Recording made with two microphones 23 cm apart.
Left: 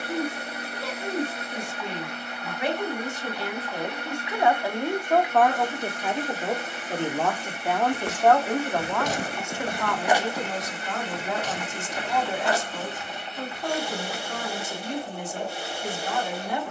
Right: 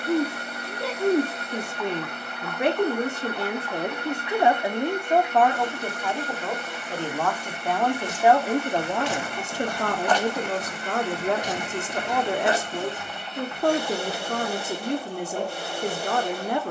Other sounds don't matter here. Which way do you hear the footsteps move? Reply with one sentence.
In this clip you hear the footsteps go from the left side to the right.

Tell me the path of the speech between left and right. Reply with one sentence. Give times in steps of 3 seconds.
In this clip you hear the speech on the right from 0 s, in the centre from 6 s and on the right from 9 s.